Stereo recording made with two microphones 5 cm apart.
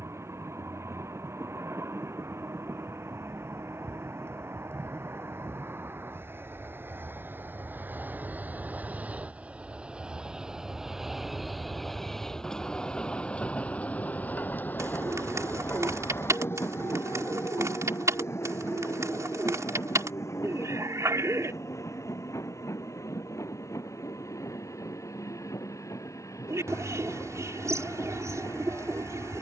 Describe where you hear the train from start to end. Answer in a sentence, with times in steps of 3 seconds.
In this clip you hear the train on the right from 0 s, in the centre from 9 s and on the left from 12 s.